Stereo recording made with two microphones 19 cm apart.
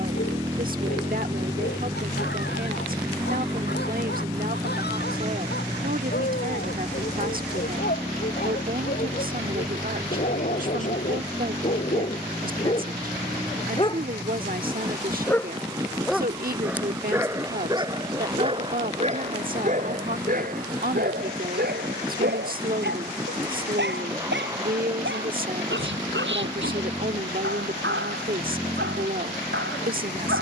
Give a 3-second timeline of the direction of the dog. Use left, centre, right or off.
left, left, left, left, left, centre, right, right, right, right.